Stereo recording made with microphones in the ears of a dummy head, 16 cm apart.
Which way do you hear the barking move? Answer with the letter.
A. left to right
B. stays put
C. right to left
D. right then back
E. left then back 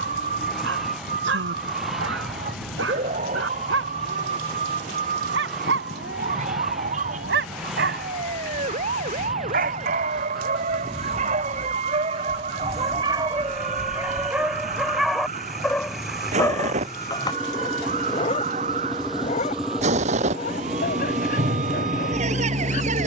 C.